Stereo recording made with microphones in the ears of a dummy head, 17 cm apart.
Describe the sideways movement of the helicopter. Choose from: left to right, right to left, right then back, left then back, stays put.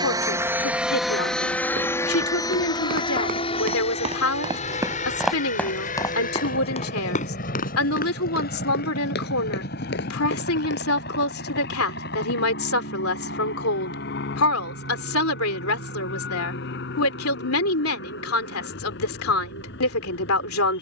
right to left.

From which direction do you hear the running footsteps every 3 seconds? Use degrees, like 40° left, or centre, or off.
60° right, 20° right, 40° left, 60° left, off, off, off.